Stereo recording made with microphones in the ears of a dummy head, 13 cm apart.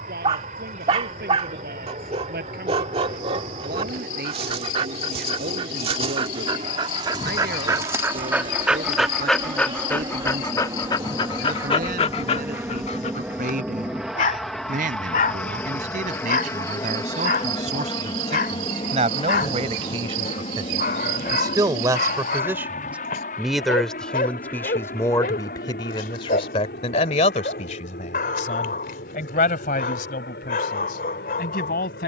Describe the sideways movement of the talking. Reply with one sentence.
In this clip you hear the talking move from right to left.